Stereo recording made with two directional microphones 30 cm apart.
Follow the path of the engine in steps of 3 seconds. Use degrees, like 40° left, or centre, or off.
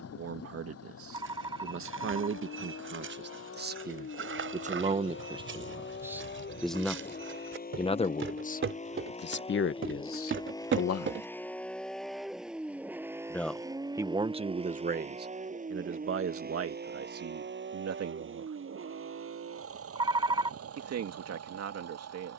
50° left, 40° left, 30° left, 10° left, 10° right, 30° right, 50° right, 50° right.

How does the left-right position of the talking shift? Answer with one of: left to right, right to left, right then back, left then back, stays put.
left then back.